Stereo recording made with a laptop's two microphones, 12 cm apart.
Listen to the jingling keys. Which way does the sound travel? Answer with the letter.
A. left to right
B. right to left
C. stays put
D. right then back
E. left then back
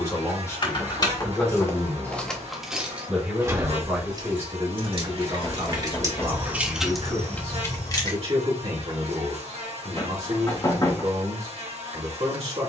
D.